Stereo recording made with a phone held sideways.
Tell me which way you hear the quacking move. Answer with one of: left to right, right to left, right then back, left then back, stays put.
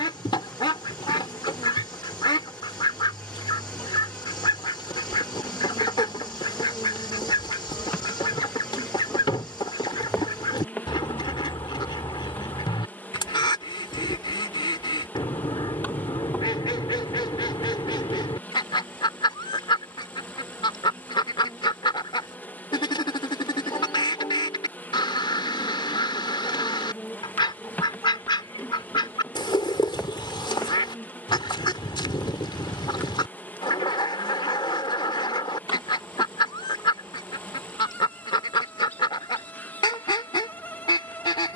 stays put.